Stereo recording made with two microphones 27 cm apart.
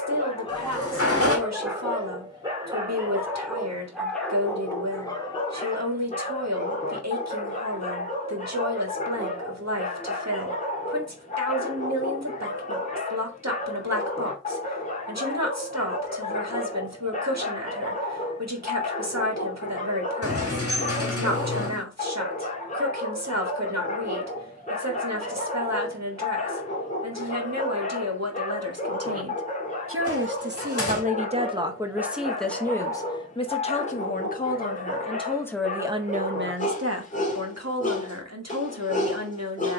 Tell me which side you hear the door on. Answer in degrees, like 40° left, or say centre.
60° left.